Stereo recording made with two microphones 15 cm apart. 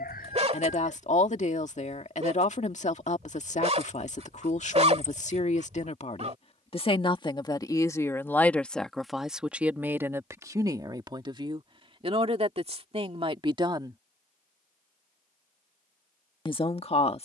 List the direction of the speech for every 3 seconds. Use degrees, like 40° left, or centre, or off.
50° left, 50° left, 20° left, 20° right, 40° right, 40° left.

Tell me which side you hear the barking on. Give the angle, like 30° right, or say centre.
50° right.